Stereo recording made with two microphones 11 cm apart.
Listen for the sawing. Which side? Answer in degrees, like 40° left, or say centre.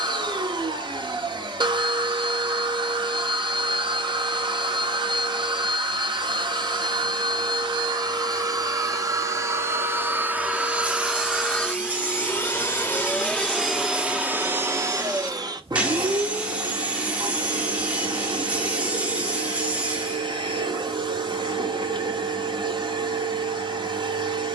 10° right.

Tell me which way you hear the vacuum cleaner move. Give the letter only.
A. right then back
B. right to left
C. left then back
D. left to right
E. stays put
C.